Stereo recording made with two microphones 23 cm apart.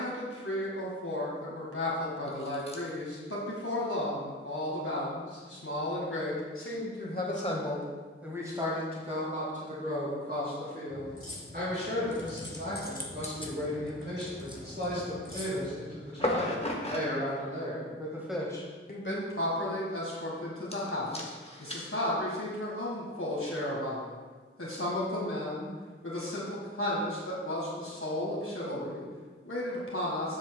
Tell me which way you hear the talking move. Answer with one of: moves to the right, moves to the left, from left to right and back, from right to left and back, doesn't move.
from left to right and back.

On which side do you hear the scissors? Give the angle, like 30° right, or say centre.
30° left.